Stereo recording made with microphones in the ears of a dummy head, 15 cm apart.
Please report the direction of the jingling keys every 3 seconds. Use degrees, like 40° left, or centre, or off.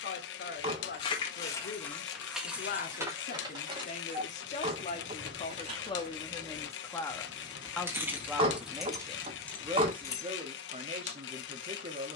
10° left, 30° right, 20° right, 10° left.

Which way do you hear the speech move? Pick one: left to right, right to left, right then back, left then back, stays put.
left to right.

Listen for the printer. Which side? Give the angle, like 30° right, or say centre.
80° left.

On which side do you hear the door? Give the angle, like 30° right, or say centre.
30° right.